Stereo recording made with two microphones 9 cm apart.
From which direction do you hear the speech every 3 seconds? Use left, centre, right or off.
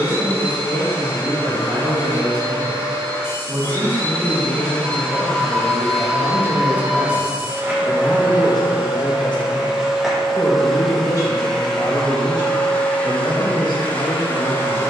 right, right, centre, left, left.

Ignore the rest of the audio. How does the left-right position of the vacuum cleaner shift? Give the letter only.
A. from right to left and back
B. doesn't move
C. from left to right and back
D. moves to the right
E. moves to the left
C.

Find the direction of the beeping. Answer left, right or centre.
right.